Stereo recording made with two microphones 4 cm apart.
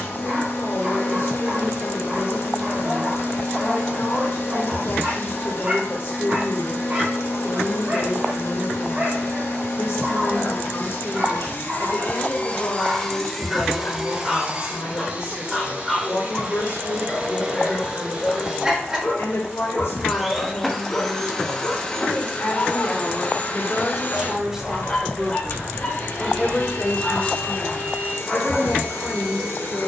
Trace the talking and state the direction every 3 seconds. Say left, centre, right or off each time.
left, left, left, left, left, left, left, left, centre, left.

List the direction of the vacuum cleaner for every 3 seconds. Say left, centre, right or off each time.
left, left, left, left, centre, right, centre, left, left, left.